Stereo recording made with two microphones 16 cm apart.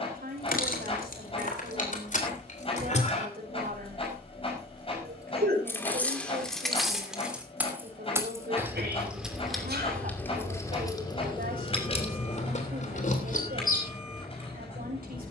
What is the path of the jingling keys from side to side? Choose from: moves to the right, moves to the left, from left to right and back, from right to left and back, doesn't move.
from left to right and back.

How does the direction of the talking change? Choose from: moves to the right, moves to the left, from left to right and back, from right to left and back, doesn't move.
doesn't move.